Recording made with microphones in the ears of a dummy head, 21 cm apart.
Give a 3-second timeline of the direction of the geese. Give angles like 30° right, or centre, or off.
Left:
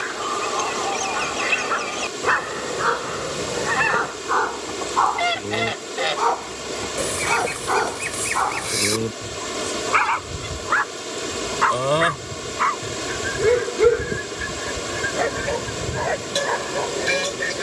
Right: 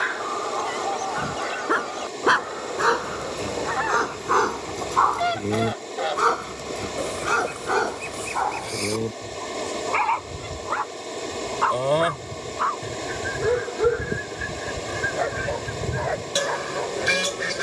40° left, 40° left, 30° left, 20° left, centre, 10° right.